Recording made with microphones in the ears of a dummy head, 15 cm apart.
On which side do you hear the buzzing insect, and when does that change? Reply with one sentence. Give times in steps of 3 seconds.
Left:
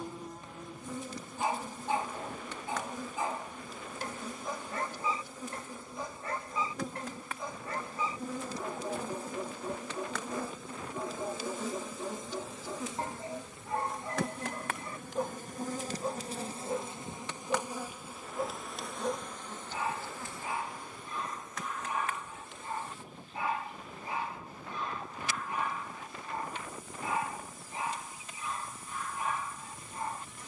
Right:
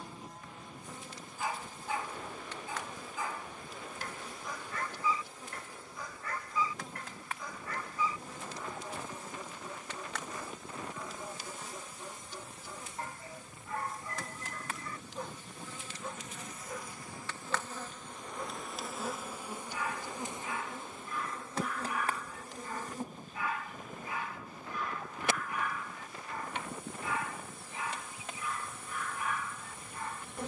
In this clip you hear the buzzing insect on the left from 0 s, in the centre from 18 s and on the right from 21 s.